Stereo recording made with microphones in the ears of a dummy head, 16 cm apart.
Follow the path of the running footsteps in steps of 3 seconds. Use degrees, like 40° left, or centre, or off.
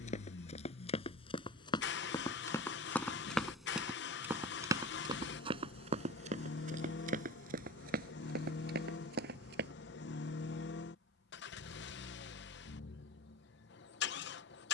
30° left, 20° right, 50° right, 60° right, off.